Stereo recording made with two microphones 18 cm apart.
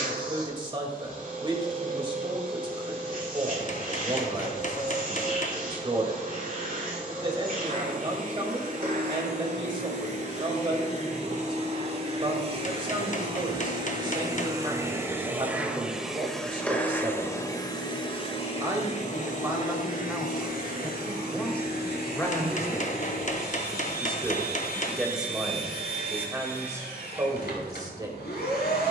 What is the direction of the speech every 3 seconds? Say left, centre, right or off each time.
right, right, right, right, right, right, centre, centre, centre, right.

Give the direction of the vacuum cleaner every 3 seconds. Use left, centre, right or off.
right, right, right, right, right, centre, left, left, left, left.